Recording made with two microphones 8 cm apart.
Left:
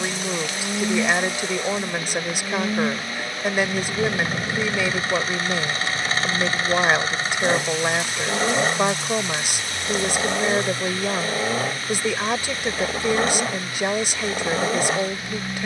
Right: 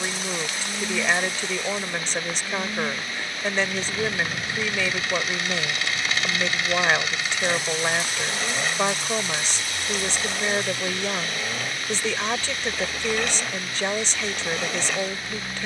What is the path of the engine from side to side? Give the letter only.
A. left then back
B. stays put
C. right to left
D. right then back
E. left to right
B.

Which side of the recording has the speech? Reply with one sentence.
In this clip you hear the speech in the centre.